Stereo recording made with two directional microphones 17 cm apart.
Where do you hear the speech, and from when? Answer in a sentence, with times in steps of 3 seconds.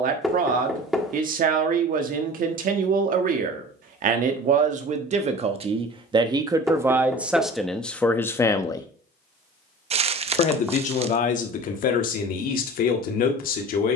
In this clip you hear the speech on the right from 0 s, in the centre from 6 s and on the left from 9 s.